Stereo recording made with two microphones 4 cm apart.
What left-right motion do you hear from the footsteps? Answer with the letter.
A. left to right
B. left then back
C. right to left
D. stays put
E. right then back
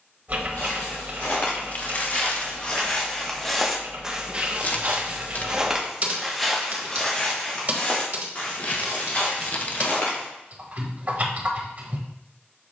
E.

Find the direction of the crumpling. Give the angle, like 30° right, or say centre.
40° left.